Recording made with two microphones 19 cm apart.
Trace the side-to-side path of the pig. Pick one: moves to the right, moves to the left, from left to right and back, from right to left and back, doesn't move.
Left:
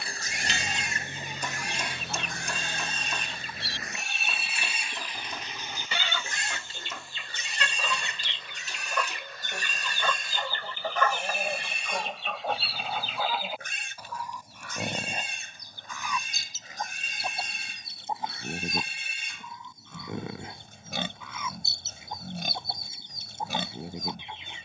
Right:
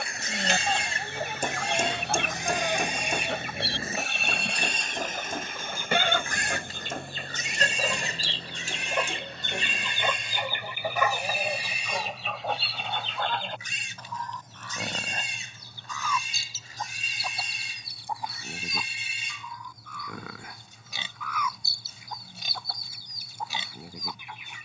moves to the left.